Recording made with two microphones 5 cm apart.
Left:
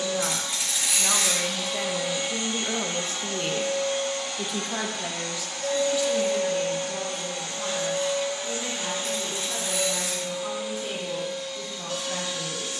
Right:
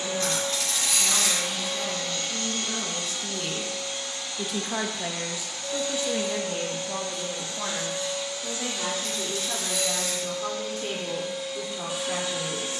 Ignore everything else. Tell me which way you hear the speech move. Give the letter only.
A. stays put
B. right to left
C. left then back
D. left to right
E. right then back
D.